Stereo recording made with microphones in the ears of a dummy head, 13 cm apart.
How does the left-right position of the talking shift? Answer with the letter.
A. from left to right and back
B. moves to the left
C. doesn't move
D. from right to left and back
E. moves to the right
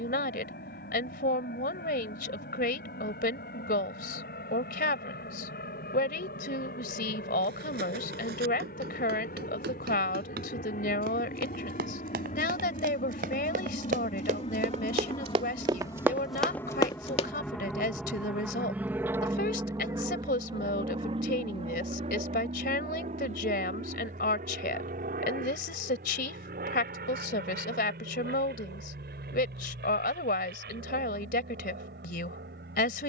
C.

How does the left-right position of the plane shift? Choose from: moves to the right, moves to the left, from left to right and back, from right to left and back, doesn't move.
moves to the right.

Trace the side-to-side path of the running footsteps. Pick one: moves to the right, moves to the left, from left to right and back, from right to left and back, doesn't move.
moves to the left.